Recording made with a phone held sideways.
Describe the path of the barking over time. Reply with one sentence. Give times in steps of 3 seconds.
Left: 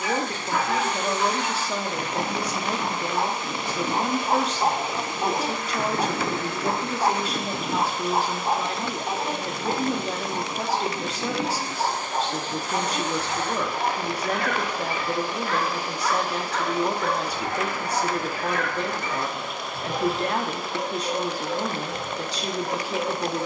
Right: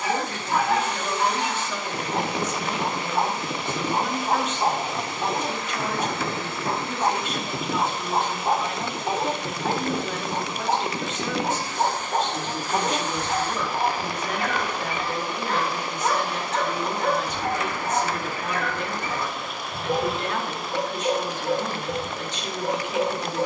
You can hear the barking on the right from 0 s, in the centre from 3 s and on the right from 9 s.